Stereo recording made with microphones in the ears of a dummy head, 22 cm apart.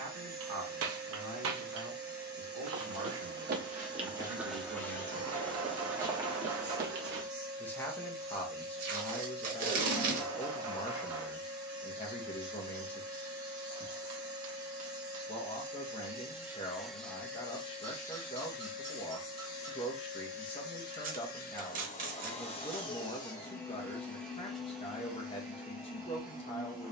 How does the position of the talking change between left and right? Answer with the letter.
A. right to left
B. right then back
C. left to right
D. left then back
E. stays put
A.